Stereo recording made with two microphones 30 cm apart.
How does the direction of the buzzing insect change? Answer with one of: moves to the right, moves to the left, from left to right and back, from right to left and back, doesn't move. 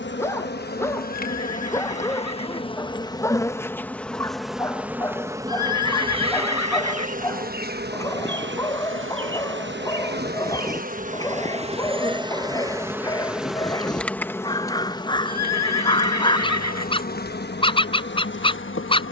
from left to right and back.